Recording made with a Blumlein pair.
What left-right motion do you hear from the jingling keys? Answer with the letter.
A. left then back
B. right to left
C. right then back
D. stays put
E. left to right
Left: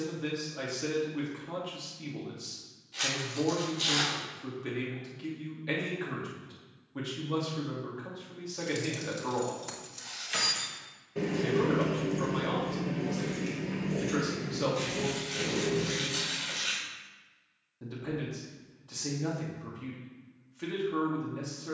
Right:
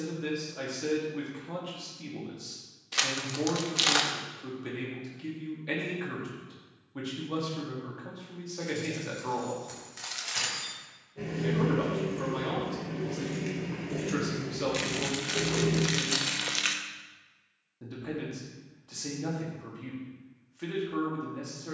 E.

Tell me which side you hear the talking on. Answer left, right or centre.
centre.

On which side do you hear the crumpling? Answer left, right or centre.
right.